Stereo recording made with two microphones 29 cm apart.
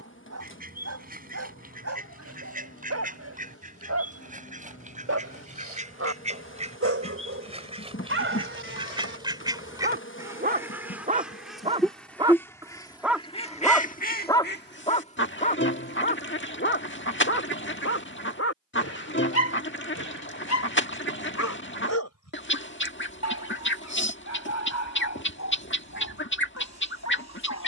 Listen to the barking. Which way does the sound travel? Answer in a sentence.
You can hear the barking go from the right side to the left.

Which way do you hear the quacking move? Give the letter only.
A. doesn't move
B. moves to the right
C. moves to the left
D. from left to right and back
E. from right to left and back
C.